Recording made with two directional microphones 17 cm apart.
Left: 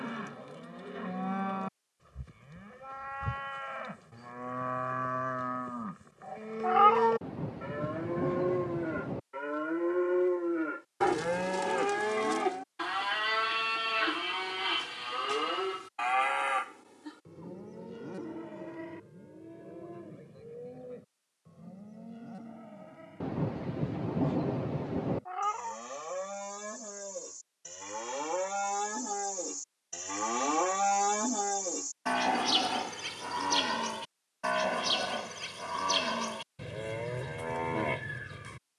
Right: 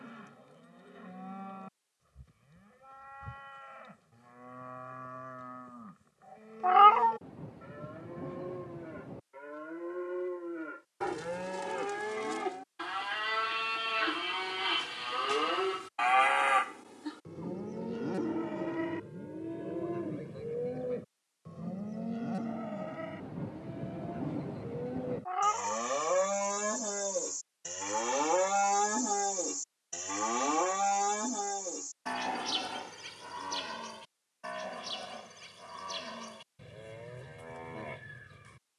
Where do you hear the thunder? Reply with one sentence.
You can hear the thunder on the left.